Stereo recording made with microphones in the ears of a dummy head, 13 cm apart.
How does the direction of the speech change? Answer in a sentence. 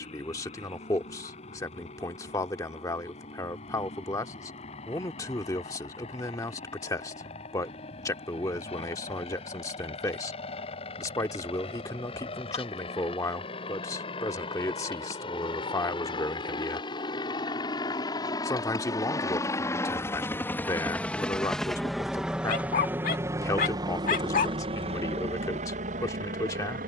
In this clip you hear the speech stay in one place.